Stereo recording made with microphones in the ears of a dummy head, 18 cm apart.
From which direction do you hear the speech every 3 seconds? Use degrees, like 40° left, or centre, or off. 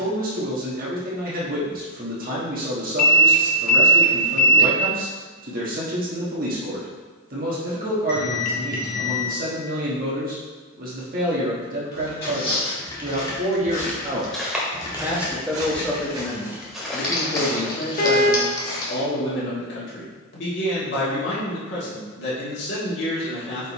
40° right, 40° right, 40° right, 40° right, 40° right, 20° left, 60° left, 60° left.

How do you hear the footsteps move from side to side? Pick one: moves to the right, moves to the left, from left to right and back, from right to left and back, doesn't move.
from left to right and back.